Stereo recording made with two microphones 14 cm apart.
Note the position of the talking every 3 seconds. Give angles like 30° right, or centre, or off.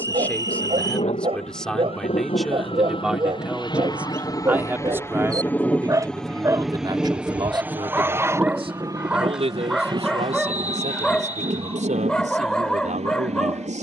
10° left, 10° right, 30° right, 50° right, 60° right.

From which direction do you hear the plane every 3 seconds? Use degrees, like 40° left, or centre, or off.
50° left, 20° left, 10° right, 30° right, 50° right.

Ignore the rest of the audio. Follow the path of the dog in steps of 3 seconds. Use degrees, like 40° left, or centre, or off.
40° right, 30° right, 10° right, centre, 10° left.